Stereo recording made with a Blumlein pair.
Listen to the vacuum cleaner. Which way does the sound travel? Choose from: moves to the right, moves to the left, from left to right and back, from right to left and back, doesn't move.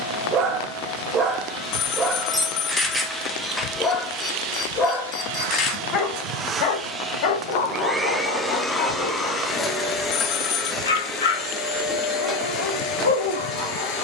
from left to right and back.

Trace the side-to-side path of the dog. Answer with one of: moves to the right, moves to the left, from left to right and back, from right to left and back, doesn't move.
moves to the left.